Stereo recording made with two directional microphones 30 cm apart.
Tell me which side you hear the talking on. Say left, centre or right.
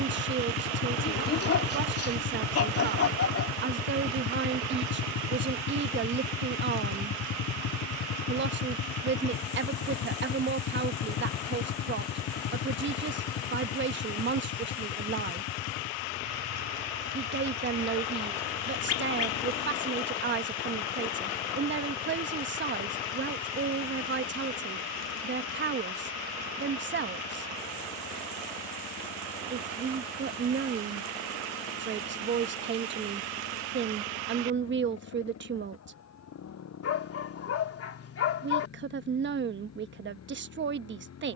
right.